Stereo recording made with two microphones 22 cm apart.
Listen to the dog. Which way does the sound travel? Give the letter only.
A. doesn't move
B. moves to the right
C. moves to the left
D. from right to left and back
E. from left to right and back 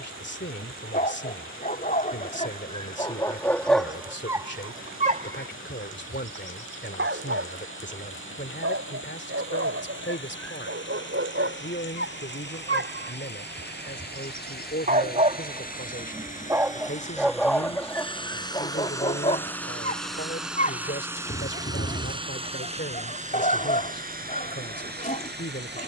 E.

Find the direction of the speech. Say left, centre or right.
left.